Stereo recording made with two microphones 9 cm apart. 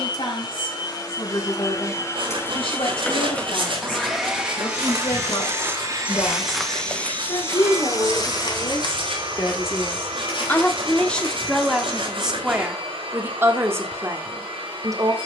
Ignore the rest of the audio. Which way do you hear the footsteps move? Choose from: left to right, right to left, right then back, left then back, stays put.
right to left.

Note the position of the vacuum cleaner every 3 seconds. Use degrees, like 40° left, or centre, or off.
40° left, 10° right, 50° right, 70° right, 70° right.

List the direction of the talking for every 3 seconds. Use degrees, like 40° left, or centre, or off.
70° left, 70° left, 50° left, 20° left, 20° right.